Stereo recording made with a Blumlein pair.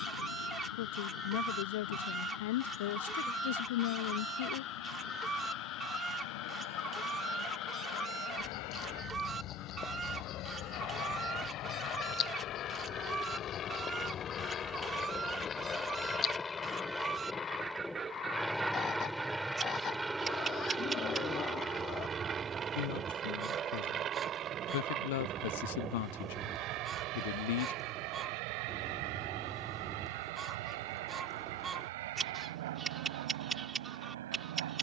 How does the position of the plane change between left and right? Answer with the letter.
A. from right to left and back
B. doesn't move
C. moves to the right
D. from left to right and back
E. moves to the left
C.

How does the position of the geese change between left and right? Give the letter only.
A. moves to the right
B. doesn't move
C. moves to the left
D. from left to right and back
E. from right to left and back
B.